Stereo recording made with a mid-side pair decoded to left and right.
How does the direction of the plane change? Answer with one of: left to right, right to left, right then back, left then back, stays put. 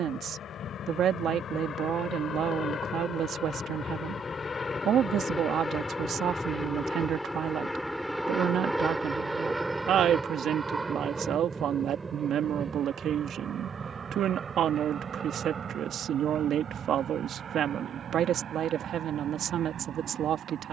left to right.